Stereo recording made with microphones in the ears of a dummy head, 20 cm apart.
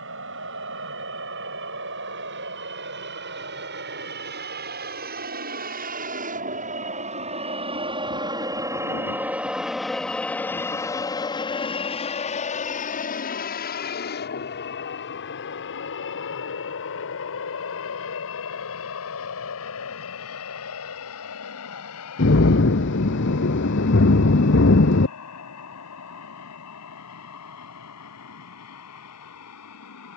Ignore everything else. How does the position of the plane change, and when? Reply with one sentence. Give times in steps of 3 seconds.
In this clip you hear the plane on the right from 0 s, in the centre from 9 s and on the left from 12 s.